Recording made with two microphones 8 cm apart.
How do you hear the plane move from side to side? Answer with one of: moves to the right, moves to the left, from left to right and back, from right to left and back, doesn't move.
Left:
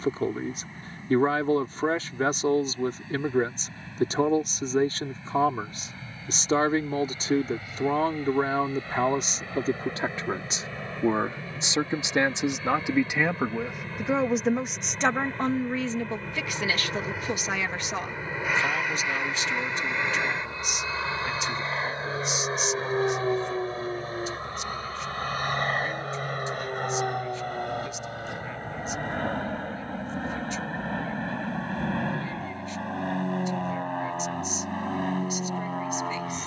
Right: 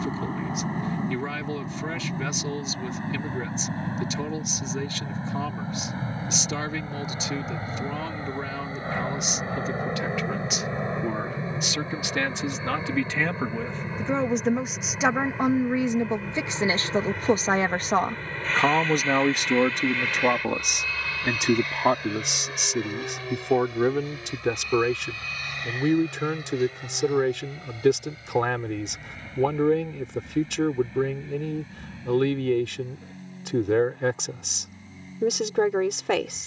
moves to the left.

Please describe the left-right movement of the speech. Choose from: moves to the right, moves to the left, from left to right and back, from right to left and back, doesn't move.
moves to the right.